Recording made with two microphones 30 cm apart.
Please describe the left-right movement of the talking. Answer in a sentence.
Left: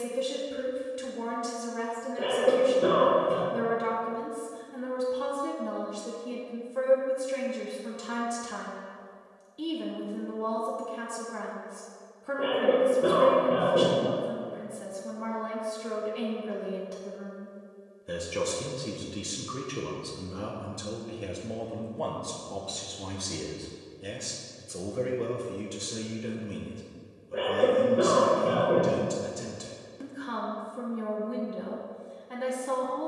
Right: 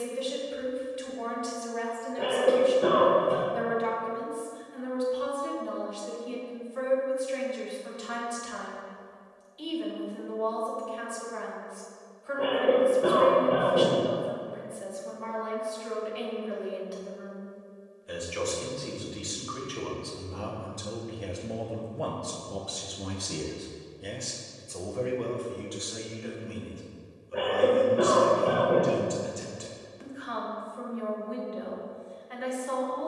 You can hear the talking move from left to right and back again.